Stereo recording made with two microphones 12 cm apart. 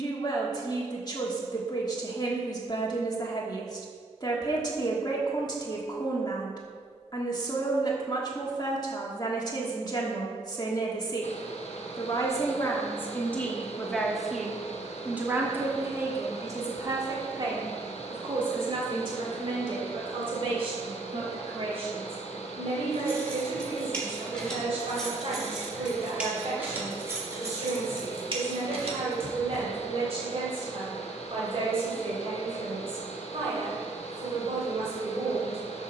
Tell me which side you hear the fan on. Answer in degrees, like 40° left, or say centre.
60° left.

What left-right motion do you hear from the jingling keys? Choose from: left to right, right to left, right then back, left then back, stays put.
left to right.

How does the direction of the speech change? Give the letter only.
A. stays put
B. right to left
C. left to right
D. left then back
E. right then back
C.